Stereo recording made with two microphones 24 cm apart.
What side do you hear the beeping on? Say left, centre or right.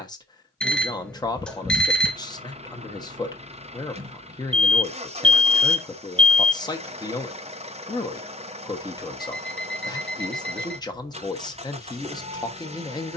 centre.